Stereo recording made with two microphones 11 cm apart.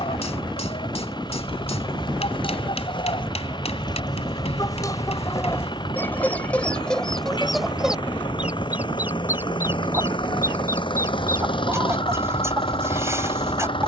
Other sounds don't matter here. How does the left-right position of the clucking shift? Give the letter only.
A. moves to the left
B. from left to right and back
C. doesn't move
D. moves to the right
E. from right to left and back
D.